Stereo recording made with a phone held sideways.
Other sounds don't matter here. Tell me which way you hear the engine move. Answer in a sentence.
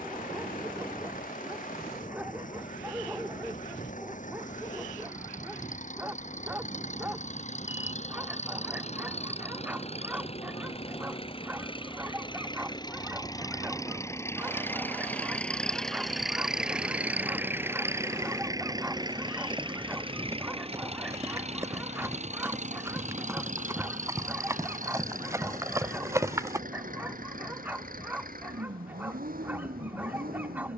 In this clip you hear the engine travel towards the right.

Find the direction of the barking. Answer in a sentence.
You can hear the barking in the centre.